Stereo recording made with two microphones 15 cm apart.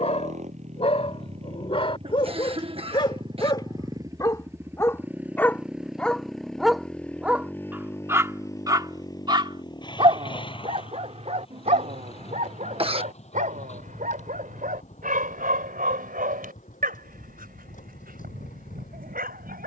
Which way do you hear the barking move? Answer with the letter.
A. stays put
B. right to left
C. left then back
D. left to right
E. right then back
D.